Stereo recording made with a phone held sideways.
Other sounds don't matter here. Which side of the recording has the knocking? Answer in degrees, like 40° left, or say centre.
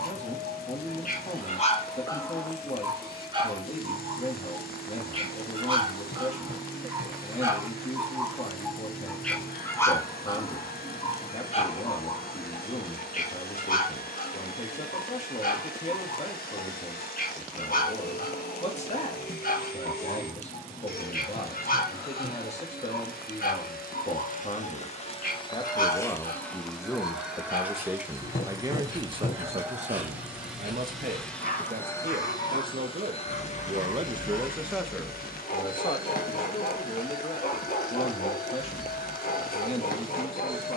60° left.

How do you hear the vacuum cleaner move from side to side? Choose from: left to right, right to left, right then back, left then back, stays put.
right then back.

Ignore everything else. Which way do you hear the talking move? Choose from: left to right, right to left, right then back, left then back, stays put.
right then back.